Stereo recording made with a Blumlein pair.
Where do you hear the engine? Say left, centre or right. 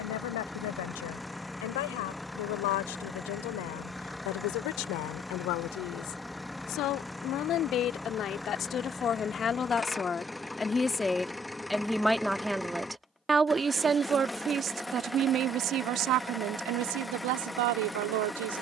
centre.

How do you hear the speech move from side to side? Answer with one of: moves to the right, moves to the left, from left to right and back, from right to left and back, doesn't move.
moves to the right.